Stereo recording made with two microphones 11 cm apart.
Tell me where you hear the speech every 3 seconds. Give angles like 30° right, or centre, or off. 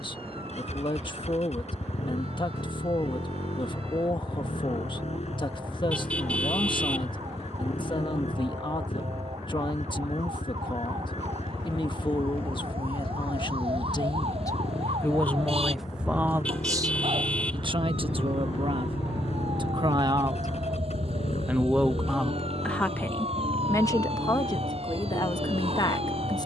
50° left, 50° left, 50° left, 50° left, 50° left, 20° right, 50° right, 10° left, 40° left.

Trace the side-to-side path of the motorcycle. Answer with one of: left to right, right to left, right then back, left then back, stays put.
stays put.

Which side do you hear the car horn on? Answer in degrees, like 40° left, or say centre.
10° left.